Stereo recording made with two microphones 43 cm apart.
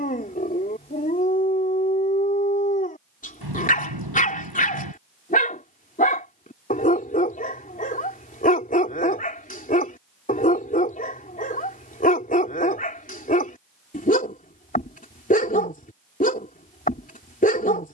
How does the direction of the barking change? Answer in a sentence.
In this clip you hear the barking stay in one place.